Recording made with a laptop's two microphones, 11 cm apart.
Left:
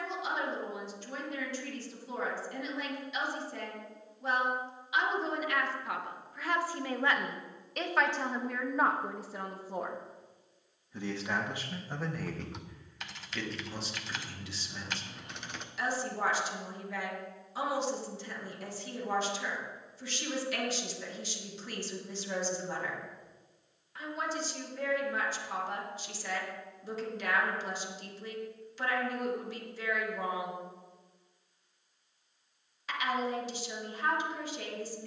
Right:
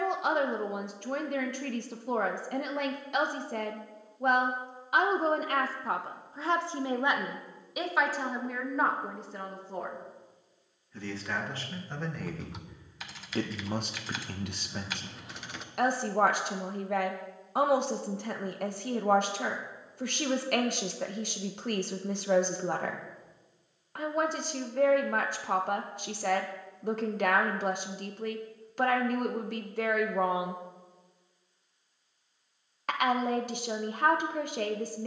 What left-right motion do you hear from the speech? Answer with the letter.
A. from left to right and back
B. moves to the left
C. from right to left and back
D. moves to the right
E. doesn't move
C.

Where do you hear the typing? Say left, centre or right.
centre.